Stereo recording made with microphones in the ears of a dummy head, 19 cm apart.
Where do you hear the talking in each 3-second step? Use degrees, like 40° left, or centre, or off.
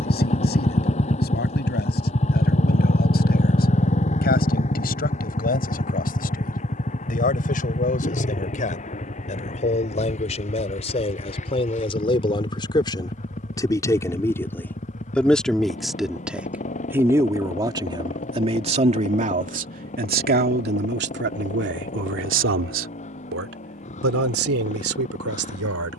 50° left, 40° left, 40° left, 30° left, 20° left, 10° right, 40° right, 60° right, 80° right.